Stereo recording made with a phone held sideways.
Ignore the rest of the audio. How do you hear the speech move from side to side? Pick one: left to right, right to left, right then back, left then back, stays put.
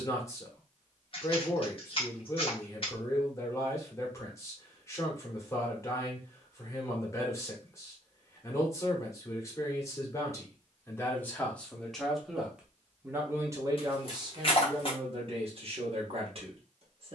left to right.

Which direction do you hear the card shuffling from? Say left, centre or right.
left.